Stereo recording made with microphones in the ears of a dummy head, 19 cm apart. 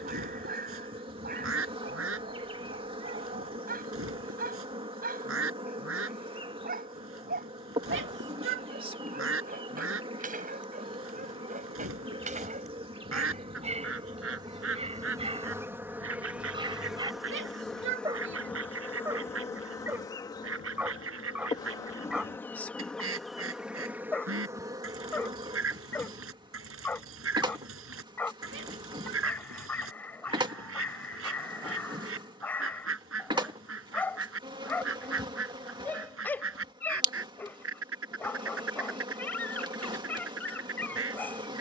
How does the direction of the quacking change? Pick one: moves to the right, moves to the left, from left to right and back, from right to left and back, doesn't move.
doesn't move.